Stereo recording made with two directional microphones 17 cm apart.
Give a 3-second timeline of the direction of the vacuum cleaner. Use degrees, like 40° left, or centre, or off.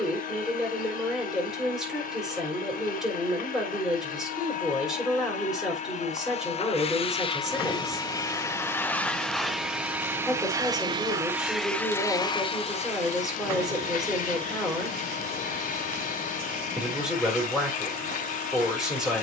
50° left, 50° left, 30° left, 10° right, 40° left, 50° left, 50° left.